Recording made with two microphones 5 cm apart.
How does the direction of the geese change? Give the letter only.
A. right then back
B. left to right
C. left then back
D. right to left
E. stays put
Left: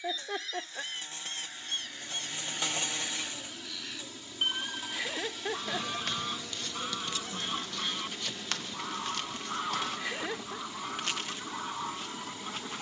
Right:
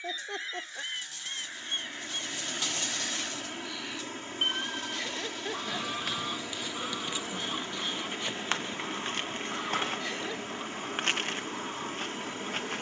D.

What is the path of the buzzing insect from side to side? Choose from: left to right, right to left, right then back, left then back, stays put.
left to right.